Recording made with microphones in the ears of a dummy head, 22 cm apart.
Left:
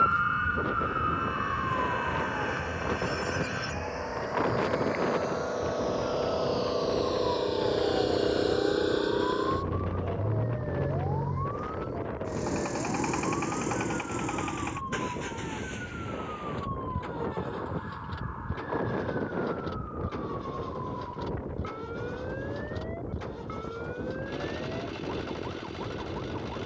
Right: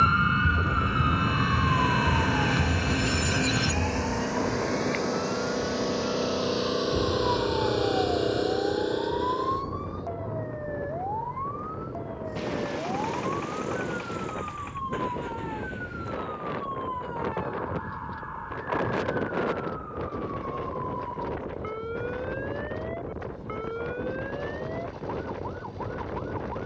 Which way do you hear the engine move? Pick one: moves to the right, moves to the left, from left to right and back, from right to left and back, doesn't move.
moves to the left.